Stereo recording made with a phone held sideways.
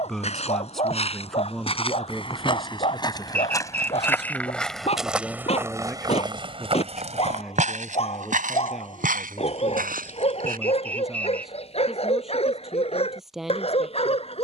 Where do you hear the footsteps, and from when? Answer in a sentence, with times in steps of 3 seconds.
In this clip you hear the footsteps on the left from 0 s, in the centre from 3 s, on the right from 6 s and not at all from 12 s.